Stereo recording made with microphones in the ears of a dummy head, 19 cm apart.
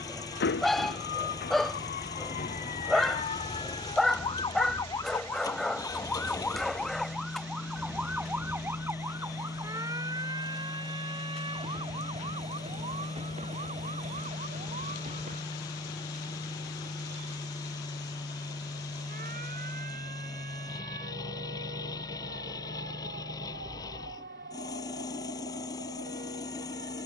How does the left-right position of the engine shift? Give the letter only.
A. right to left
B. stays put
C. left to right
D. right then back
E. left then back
B.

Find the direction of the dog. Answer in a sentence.
In this clip you hear the dog in the centre.